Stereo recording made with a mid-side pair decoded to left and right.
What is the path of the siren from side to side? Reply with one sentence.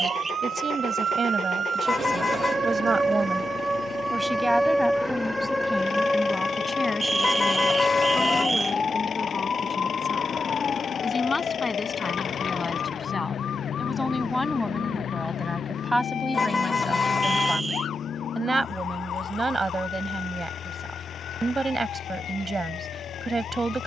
You can hear the siren move to the left.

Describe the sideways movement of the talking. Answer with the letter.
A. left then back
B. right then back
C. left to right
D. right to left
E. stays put
A.